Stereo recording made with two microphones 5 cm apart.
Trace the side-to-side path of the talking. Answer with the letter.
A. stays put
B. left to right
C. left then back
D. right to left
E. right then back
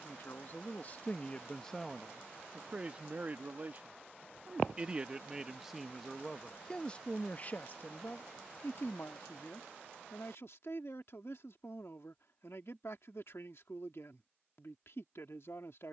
E.